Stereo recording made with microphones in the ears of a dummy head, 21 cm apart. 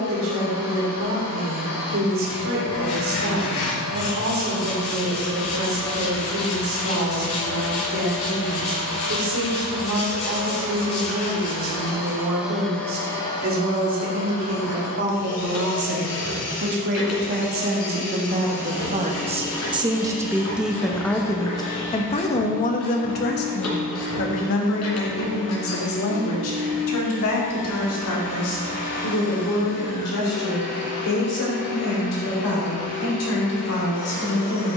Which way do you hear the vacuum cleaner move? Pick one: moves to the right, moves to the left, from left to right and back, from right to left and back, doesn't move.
from left to right and back.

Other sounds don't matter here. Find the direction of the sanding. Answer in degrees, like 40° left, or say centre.
70° left.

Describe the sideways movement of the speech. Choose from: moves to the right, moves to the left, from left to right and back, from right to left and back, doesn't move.
moves to the left.